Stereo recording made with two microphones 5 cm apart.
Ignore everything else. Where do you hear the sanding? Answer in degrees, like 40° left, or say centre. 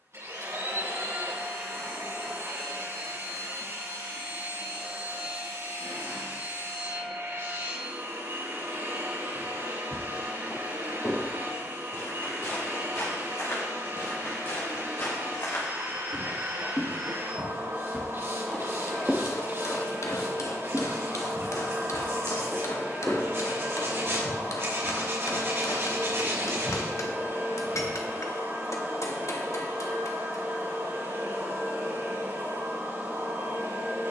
60° right.